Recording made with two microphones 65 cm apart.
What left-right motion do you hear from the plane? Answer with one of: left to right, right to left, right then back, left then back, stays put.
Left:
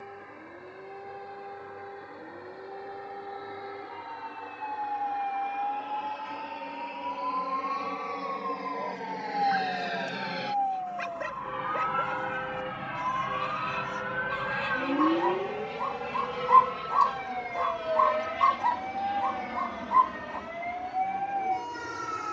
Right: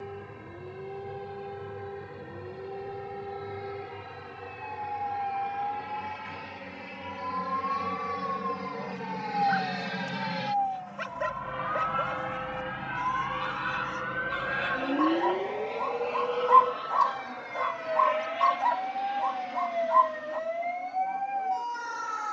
right to left.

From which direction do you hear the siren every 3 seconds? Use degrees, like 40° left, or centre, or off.
50° right, 50° right, 40° right, 30° right, 10° right, 10° left, 30° left, 50° left.